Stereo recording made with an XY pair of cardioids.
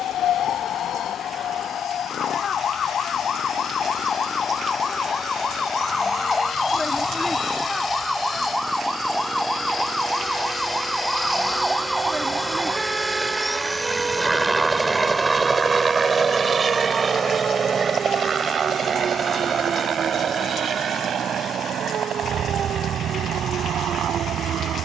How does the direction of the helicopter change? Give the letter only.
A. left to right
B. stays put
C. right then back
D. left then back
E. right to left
A.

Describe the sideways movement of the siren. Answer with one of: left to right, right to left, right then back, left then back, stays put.
left to right.